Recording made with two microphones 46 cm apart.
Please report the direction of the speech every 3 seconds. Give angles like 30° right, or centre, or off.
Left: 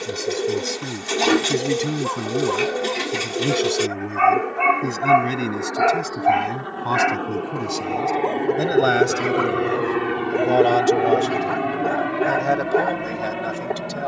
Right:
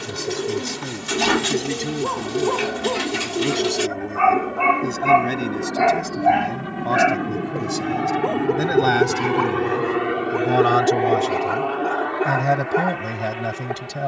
10° left, 20° left, centre, 20° right, 50° right.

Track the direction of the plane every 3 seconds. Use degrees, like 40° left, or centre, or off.
70° right, 60° right, 40° right, 10° left, 50° left.